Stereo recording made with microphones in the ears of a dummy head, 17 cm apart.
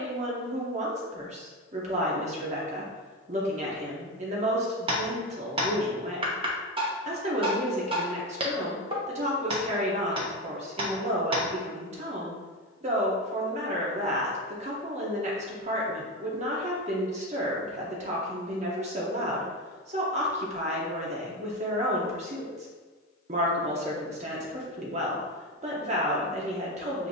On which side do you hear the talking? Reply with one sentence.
You can hear the talking on the right.